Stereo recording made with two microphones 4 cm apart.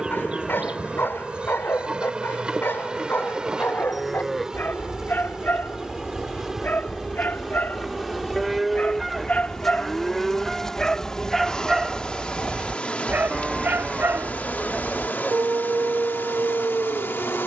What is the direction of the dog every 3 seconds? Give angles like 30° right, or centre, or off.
60° left, 50° left, 40° left, 20° left, 50° right, 80° right.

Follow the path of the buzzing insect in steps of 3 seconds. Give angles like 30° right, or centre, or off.
20° right, 10° right, centre, 20° left, 40° left, 60° left.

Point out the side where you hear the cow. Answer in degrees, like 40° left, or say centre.
centre.